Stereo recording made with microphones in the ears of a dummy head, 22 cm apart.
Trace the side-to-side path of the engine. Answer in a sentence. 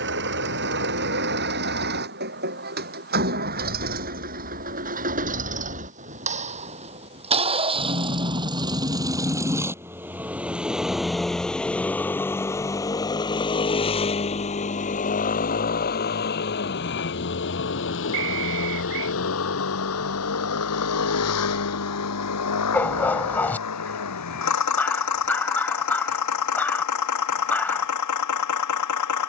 You can hear the engine go from the right side to the left.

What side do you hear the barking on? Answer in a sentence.
You can hear the barking in the centre.